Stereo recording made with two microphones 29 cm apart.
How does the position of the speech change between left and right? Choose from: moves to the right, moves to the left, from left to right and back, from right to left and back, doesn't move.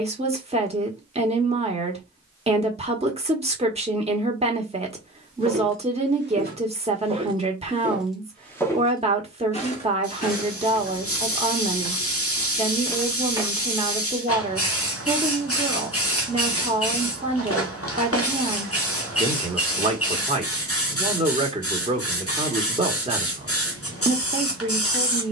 doesn't move.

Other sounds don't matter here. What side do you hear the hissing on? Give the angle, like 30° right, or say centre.
50° left.